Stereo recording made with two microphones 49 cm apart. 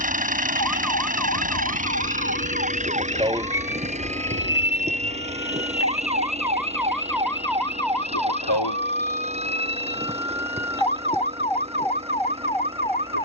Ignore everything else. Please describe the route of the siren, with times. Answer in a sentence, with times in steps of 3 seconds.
You can hear the siren on the right from 0 s, in the centre from 3 s and on the left from 6 s.